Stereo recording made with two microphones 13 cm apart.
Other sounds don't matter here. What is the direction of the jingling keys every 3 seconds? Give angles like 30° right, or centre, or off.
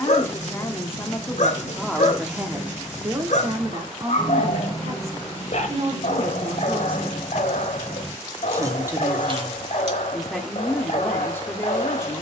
30° right, 10° left, centre, 50° right.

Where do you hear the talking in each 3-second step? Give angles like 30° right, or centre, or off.
10° left, 40° right, 30° right, 10° left.